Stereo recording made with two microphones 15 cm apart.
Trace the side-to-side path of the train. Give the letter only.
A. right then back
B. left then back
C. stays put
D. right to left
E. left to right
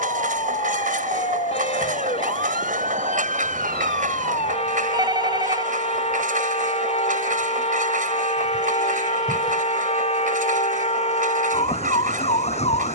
C.